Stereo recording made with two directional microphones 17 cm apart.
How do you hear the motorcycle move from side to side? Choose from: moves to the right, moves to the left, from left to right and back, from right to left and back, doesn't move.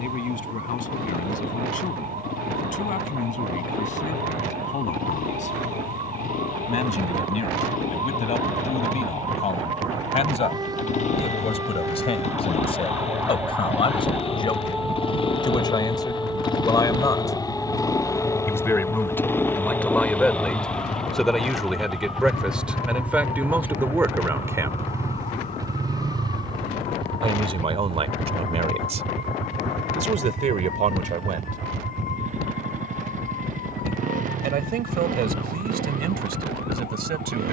moves to the right.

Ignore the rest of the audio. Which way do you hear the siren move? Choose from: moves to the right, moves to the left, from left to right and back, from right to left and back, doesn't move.
moves to the left.